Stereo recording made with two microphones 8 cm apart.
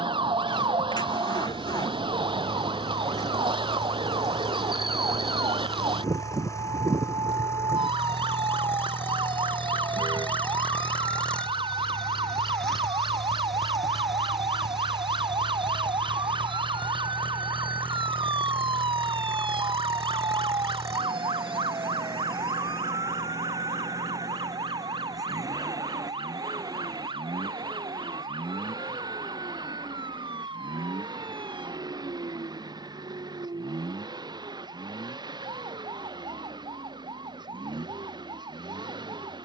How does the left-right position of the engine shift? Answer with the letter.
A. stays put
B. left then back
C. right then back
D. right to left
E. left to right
E.